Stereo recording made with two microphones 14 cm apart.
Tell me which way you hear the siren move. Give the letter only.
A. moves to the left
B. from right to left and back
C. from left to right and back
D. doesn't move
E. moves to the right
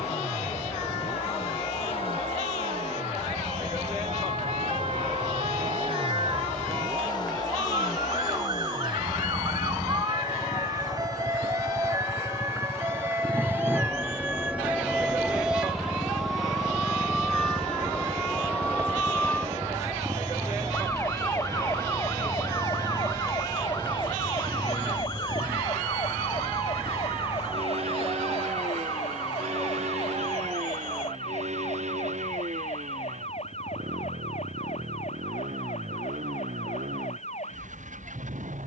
A.